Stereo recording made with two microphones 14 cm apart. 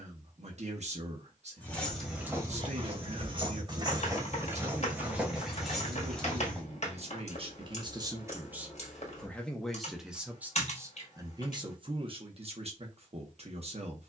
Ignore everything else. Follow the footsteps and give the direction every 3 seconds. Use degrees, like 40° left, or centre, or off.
10° right, 20° right, 10° left, off, off.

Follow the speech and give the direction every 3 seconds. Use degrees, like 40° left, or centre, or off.
50° right, 50° right, 40° right, 10° right, 50° right.